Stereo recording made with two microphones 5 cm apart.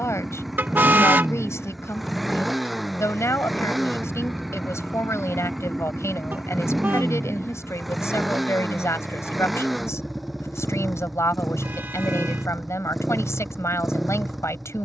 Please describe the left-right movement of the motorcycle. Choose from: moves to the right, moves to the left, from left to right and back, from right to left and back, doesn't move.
doesn't move.